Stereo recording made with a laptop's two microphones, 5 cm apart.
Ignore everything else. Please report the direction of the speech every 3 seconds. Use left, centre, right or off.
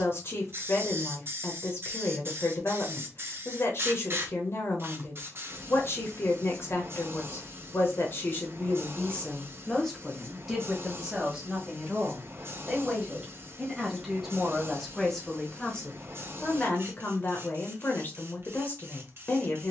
left, left, left, centre, centre, left, left.